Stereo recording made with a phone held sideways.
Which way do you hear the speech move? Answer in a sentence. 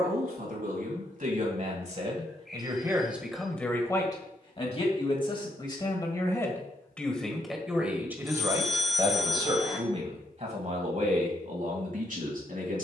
You can hear the speech move from right to left and back again.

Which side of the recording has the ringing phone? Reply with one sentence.
In this clip you hear the ringing phone in the centre.